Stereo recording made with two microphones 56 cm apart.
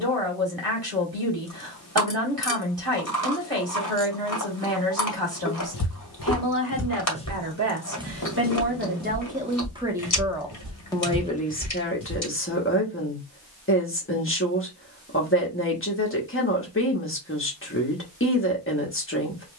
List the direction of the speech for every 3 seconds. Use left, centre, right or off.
right, right, right, centre, left, left, left.